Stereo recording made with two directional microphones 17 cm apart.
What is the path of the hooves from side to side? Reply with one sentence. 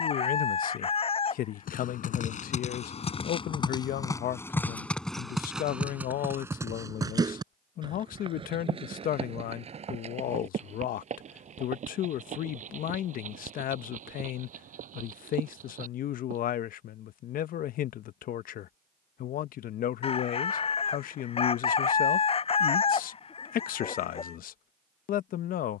In this clip you hear the hooves move to the right.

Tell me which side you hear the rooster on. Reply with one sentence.
In this clip you hear the rooster on the left.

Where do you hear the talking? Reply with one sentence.
In this clip you hear the talking on the left.